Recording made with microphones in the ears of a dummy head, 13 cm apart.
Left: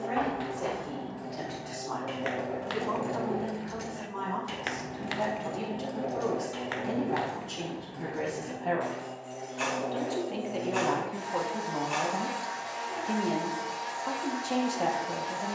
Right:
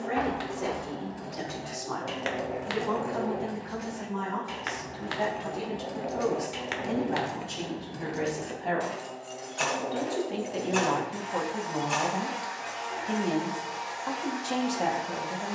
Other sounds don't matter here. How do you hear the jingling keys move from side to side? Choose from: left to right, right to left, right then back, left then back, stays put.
left then back.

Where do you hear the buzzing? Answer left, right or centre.
left.